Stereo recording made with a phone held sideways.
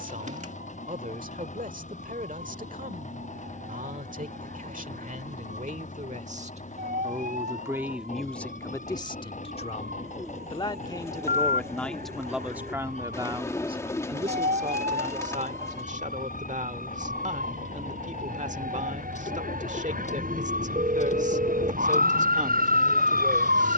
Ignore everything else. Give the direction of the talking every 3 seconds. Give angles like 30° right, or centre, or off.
60° right, 60° right, 20° right, 30° left, 30° right, 50° right, 50° right, 50° right.